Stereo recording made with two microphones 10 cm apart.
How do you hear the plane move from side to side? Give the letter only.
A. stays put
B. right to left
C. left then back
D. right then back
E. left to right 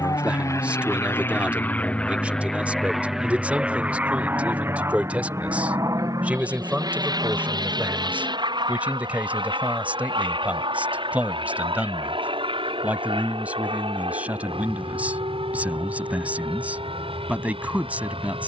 E.